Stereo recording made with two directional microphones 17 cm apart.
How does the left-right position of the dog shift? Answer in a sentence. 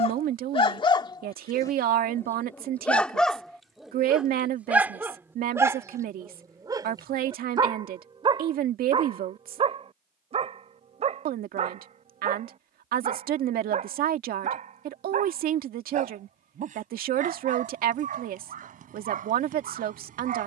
In this clip you hear the dog go from the left side to the right.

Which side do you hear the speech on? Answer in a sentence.
In this clip you hear the speech on the right.